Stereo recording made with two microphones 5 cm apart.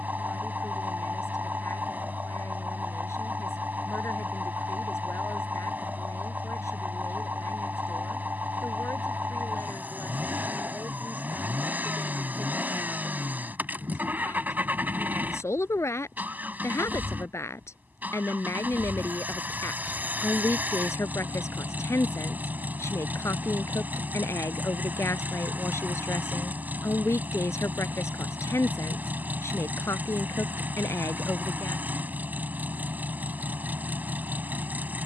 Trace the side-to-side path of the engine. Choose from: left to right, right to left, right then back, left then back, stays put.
stays put.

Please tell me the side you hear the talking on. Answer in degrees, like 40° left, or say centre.
60° left.